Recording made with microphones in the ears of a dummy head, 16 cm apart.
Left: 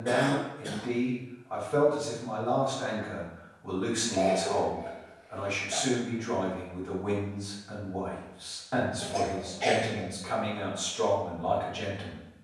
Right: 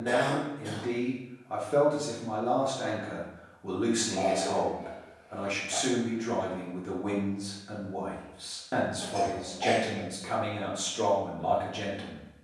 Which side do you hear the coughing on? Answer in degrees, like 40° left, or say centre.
20° left.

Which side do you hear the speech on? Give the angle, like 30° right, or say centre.
40° right.